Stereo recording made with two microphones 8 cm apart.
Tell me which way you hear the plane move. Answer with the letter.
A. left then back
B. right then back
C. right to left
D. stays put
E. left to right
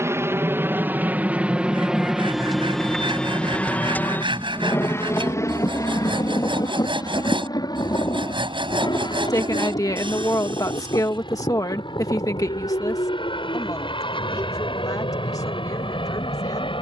C.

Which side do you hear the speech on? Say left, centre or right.
left.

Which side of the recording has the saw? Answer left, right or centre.
right.